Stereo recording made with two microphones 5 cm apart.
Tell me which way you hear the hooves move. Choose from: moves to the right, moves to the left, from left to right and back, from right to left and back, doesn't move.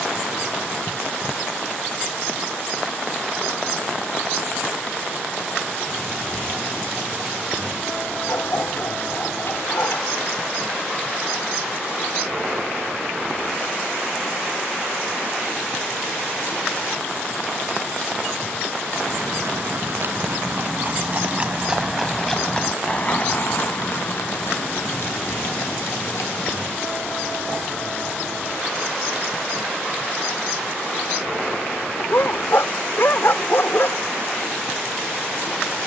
moves to the left.